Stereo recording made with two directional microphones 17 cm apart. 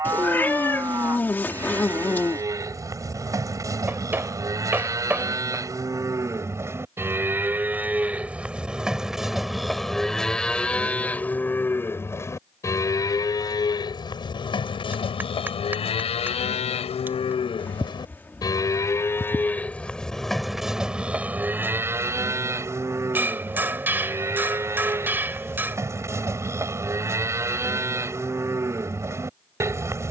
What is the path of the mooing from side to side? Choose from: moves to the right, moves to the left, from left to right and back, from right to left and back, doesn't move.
from right to left and back.